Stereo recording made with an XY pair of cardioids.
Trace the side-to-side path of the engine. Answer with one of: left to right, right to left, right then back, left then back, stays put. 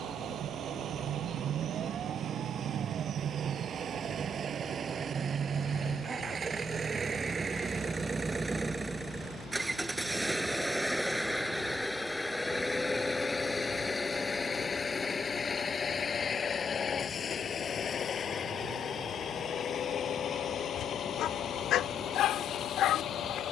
right to left.